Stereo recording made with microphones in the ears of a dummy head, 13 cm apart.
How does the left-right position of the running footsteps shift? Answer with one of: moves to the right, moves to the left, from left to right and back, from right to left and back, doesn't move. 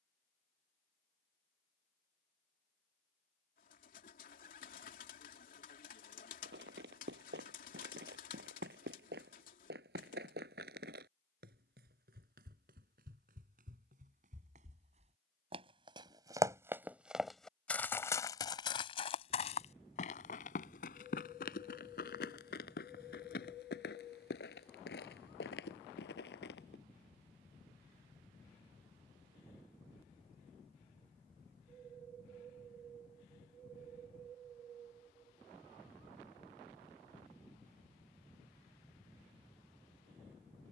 moves to the left.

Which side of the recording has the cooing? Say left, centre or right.
left.